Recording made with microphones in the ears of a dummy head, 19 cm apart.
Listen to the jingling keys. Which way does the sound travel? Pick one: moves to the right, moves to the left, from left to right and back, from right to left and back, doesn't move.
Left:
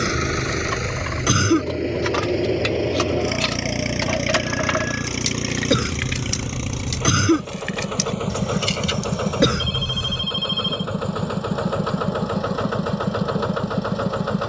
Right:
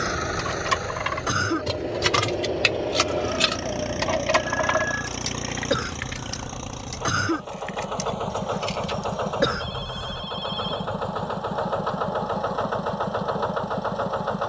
moves to the left.